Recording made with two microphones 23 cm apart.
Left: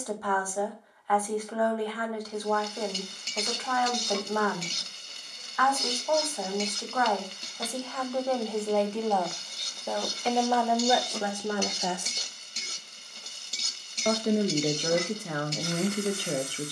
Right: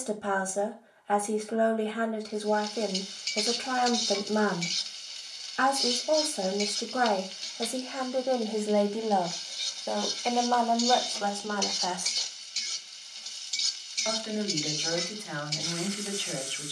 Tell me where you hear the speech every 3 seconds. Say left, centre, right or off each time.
right, right, right, centre, left, left.